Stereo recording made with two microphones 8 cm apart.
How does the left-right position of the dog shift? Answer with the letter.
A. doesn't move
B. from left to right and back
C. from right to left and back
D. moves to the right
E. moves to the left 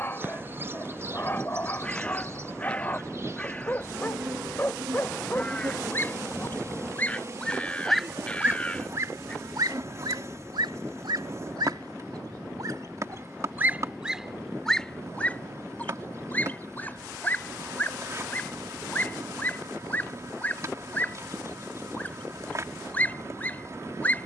B.